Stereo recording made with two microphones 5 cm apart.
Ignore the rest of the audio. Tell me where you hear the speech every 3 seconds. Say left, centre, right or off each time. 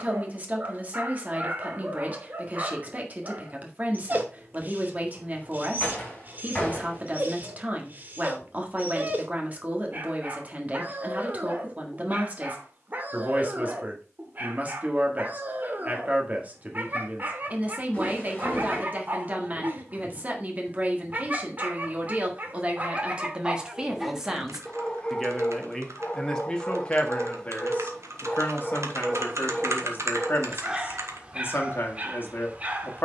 right, right, right, right, right, right, right, right, centre, left, left.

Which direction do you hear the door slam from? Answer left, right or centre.
left.